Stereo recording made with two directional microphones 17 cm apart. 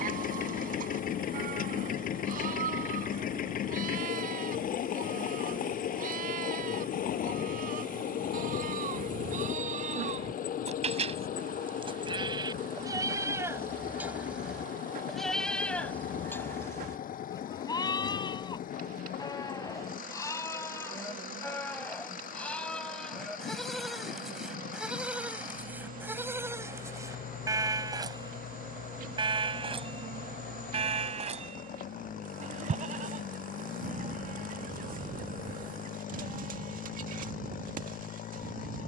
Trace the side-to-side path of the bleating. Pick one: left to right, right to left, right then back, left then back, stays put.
left then back.